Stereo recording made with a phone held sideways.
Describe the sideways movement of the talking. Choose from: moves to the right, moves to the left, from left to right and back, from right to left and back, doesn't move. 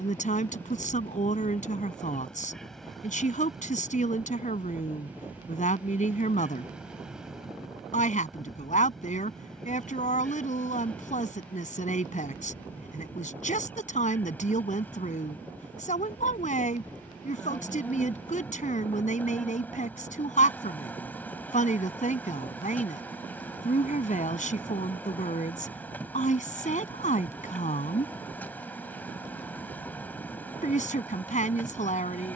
doesn't move.